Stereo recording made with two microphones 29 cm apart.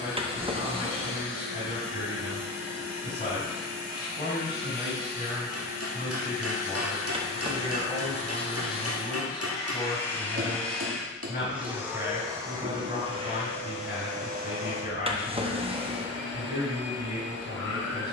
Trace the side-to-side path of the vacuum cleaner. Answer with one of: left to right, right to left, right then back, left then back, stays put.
left to right.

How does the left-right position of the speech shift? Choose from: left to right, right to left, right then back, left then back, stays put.
stays put.